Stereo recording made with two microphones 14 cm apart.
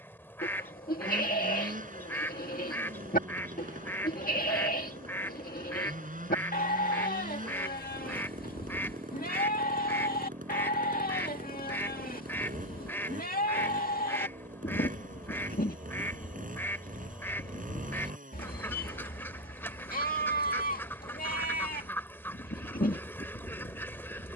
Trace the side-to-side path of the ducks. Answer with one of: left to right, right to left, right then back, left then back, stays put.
stays put.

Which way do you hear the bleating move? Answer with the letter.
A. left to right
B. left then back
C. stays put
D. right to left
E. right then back
C.